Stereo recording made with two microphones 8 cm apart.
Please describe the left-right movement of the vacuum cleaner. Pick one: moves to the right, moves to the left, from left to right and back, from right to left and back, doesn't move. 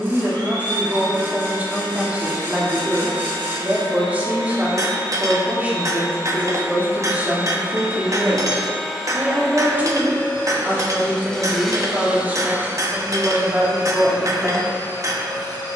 from right to left and back.